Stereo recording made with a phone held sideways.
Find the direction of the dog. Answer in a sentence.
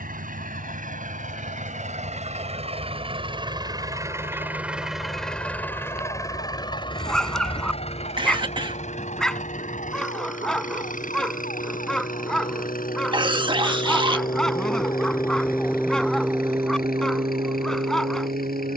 In this clip you hear the dog in the centre.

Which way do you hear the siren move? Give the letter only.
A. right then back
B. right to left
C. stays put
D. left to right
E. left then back
D.